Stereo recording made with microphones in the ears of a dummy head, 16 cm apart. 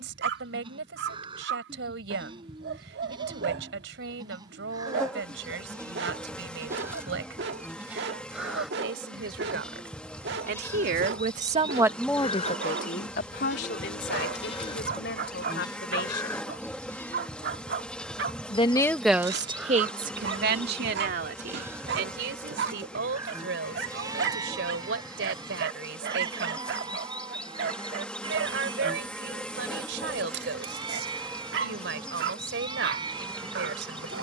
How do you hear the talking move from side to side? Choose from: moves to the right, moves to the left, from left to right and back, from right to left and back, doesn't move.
from right to left and back.